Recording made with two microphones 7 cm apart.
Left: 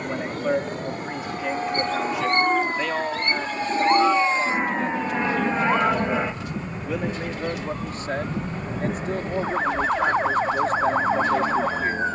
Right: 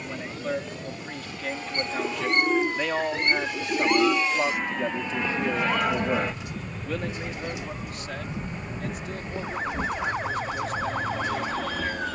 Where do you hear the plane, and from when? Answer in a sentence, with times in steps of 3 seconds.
You can hear the plane on the left from 0 s, in the centre from 6 s and on the right from 9 s.